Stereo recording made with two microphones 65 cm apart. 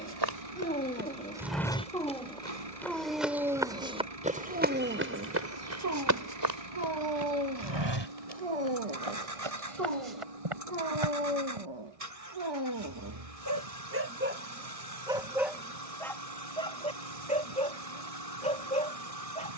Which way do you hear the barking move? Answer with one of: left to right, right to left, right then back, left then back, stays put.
right then back.